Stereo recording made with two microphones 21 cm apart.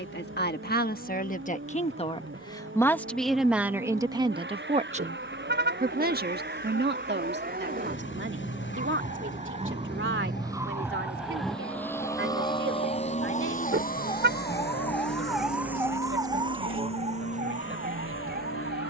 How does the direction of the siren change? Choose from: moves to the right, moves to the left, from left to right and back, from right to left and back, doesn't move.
moves to the right.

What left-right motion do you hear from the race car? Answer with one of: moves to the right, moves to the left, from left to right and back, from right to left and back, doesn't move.
moves to the left.